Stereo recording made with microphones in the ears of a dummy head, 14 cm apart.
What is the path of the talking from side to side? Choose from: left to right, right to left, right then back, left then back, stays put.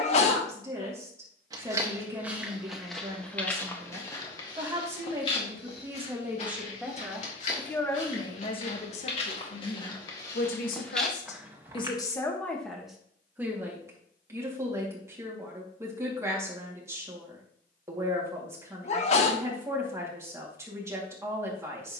left then back.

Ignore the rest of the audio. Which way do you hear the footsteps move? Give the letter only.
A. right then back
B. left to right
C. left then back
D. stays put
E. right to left
C.